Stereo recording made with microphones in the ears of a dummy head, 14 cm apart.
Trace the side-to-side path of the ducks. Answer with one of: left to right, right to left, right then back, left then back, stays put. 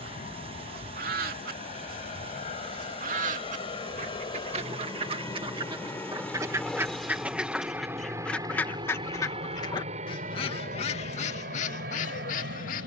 right to left.